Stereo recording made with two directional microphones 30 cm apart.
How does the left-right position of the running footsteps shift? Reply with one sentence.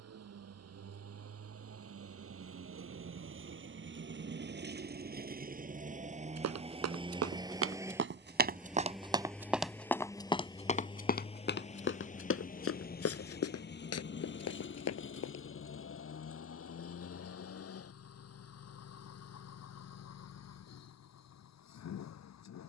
You can hear the running footsteps move to the left.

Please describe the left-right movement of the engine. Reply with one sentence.
In this clip you hear the engine go from the right side to the left.